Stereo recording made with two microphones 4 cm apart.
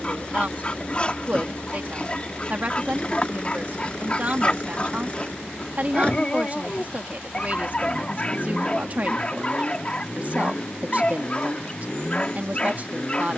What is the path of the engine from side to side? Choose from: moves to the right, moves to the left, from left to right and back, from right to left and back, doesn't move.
doesn't move.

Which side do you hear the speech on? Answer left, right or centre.
right.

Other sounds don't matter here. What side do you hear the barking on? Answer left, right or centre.
left.